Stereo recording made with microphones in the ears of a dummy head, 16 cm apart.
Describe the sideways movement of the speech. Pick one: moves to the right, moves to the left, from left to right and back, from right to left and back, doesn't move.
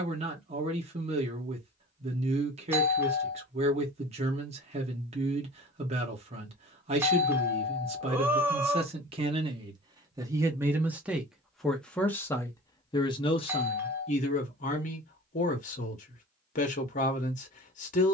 moves to the left.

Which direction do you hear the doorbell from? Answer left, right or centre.
centre.